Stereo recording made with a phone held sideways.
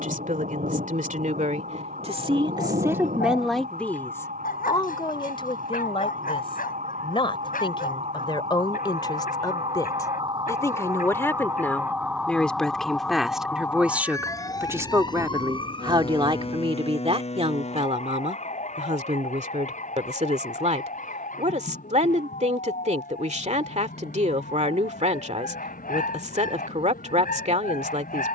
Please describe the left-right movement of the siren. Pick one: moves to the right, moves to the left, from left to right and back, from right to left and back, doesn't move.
moves to the left.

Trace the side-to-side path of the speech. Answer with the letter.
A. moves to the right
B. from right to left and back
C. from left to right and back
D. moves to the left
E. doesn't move
B.